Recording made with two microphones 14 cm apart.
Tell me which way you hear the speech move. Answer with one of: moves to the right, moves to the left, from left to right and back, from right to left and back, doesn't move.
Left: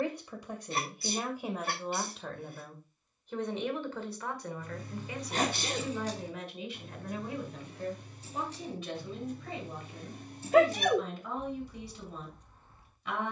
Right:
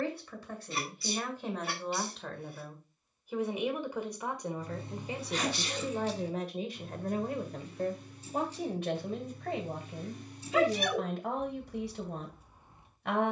moves to the right.